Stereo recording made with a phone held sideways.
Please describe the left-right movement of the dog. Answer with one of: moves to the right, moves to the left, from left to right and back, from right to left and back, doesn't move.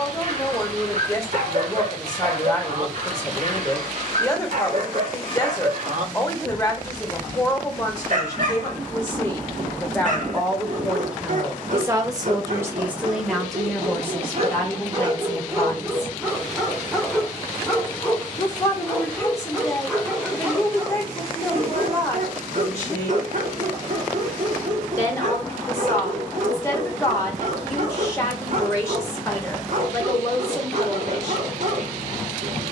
from right to left and back.